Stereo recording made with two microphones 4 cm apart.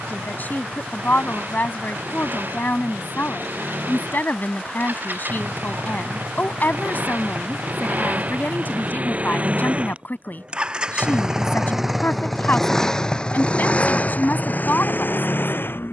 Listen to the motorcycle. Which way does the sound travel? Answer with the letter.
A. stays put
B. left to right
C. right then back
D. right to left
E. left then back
D.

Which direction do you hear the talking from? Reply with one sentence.
You can hear the talking on the left.